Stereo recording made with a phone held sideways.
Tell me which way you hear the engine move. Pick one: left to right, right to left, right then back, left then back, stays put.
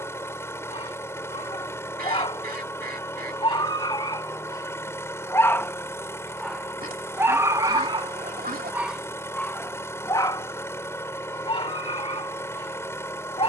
stays put.